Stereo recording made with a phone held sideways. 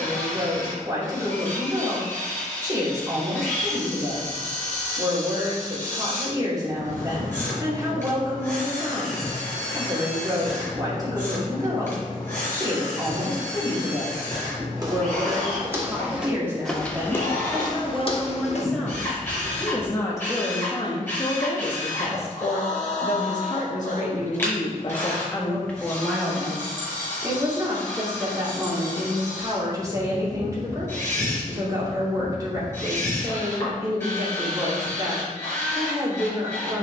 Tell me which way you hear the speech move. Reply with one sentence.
You can hear the speech go left and come back.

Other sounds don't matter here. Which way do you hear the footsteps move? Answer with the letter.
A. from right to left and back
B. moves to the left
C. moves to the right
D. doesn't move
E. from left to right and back
B.